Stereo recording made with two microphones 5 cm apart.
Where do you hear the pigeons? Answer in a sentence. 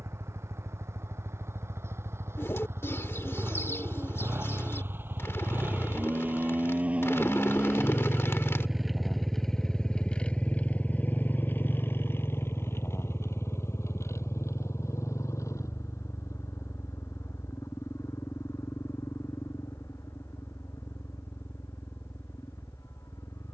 You can hear the pigeons on the left.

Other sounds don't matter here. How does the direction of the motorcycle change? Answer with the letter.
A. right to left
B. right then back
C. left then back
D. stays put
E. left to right
A.